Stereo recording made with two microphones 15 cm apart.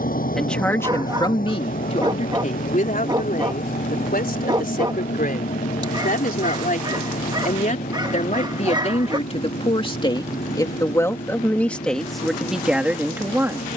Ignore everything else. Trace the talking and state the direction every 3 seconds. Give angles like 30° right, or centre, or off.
40° left, 70° left, 60° left, 20° left, 10° right.